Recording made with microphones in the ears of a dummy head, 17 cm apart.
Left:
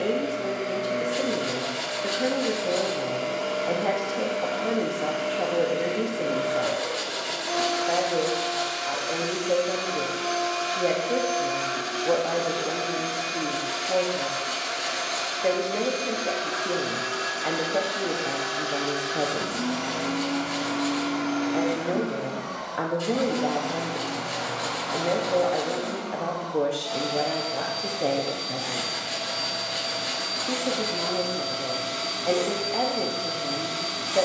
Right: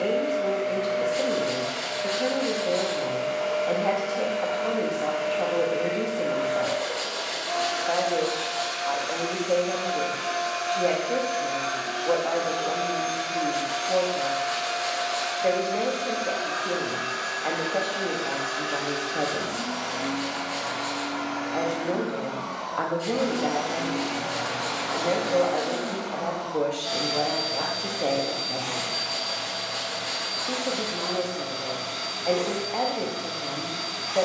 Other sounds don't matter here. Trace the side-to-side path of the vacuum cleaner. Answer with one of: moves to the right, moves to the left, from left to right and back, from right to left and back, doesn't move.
from left to right and back.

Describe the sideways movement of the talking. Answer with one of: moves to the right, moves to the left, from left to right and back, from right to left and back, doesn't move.
doesn't move.